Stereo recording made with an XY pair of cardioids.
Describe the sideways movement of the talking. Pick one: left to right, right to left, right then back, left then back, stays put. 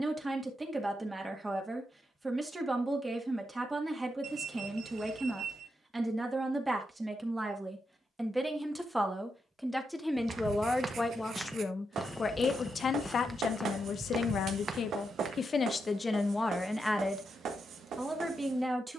left then back.